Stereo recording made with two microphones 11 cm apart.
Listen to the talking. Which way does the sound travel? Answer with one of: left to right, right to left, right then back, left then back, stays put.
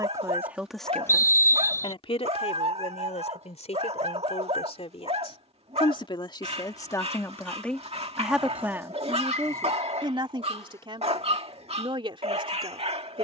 left then back.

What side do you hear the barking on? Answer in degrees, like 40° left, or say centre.
60° right.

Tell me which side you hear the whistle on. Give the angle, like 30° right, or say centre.
20° left.